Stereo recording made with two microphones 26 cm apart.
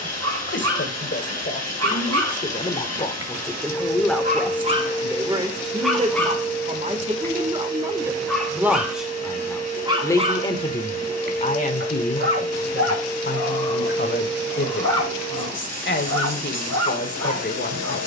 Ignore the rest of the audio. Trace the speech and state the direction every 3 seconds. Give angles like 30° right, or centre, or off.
40° left, centre, 20° right, 20° left, 40° left, 40° left.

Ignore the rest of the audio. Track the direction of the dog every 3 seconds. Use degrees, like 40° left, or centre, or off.
70° right, 30° right, centre, 30° right, 70° right, 70° right.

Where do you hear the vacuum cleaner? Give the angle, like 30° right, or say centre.
30° left.